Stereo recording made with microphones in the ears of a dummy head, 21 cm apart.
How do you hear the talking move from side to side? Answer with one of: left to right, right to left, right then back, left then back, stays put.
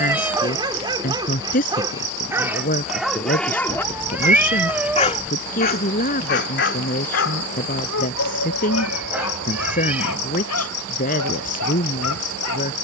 stays put.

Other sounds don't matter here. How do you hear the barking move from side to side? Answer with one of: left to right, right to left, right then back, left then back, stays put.
right to left.